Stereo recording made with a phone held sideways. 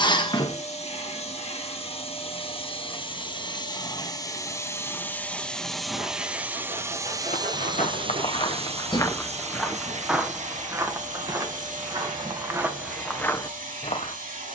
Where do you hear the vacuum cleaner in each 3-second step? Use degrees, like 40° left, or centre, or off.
50° left, 20° left, 30° right, 60° right, 70° right.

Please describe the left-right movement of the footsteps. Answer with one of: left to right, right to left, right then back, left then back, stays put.
right then back.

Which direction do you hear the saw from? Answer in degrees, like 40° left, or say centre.
70° right.